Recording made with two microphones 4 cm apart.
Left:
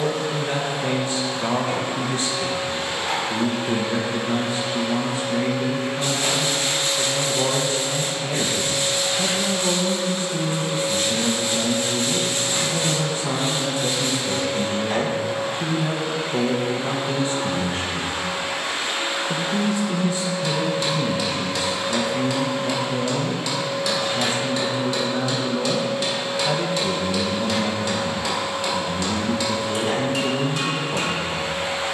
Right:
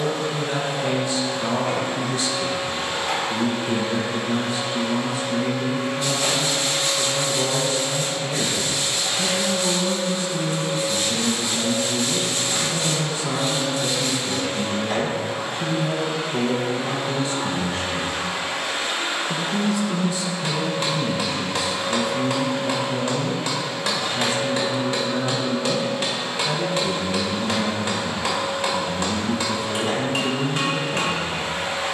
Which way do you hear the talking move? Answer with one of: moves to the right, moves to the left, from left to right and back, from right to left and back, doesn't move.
doesn't move.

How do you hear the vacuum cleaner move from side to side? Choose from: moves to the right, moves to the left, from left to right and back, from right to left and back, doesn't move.
doesn't move.